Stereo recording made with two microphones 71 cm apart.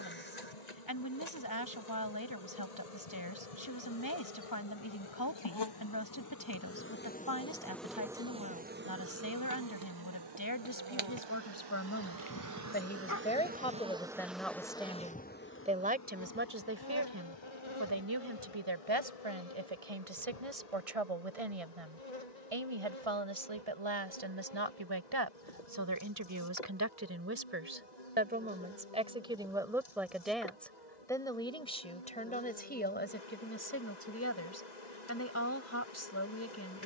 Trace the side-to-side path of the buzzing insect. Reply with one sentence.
In this clip you hear the buzzing insect go right and come back.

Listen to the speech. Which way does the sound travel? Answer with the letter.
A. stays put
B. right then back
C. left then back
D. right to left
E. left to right
B.